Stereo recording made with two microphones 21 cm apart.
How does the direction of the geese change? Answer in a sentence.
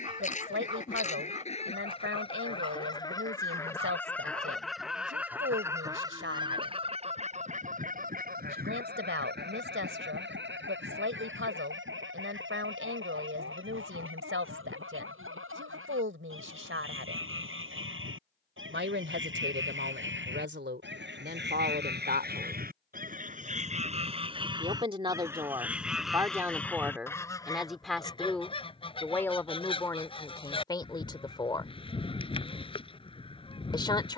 You can hear the geese move from left to right and back again.